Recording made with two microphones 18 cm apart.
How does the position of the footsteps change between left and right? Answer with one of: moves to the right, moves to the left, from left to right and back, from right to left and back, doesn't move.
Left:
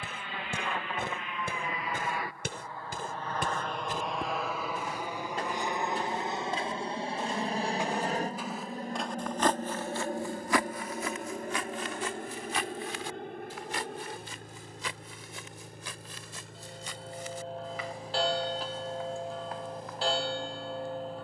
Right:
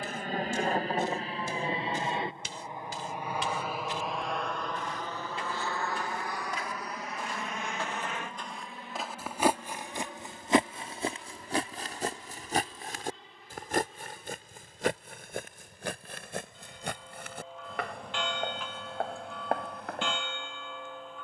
moves to the right.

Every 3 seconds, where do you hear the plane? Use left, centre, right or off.
right, centre, left, left, left, left, left.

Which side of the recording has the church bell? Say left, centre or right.
left.